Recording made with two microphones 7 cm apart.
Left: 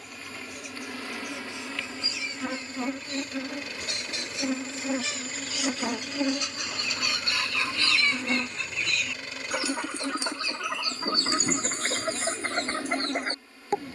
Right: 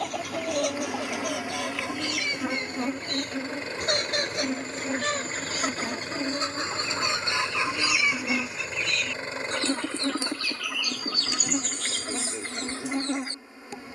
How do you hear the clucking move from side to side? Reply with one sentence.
In this clip you hear the clucking travel towards the left.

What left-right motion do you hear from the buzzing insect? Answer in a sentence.
You can hear the buzzing insect go left and come back.